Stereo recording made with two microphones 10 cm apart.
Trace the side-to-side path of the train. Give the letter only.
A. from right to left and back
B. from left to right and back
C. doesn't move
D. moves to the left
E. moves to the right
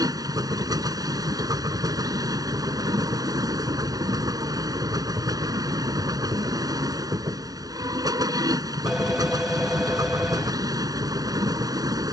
C.